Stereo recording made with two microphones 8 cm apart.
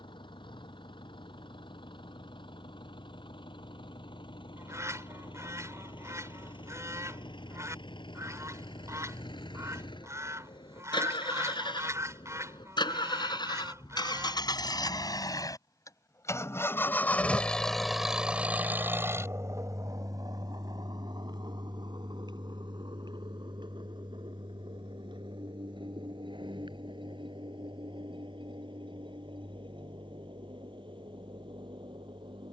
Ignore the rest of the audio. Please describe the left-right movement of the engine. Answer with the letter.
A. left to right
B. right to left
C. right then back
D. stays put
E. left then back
A.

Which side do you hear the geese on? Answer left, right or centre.
right.